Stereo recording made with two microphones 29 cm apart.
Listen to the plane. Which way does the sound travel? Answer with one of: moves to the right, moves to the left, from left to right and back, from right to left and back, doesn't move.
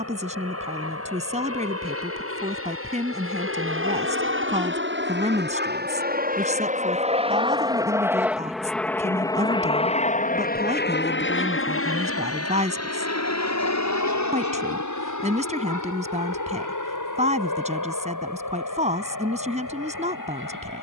moves to the left.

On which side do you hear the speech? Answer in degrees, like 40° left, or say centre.
20° right.